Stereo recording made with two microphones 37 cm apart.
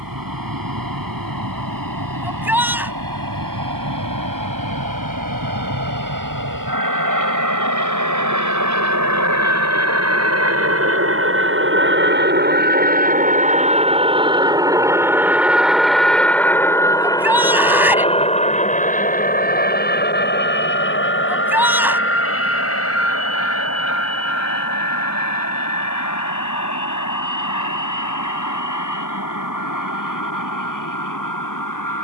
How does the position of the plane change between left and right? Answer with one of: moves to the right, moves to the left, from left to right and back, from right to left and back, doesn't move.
moves to the left.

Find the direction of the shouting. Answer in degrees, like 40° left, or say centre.
10° right.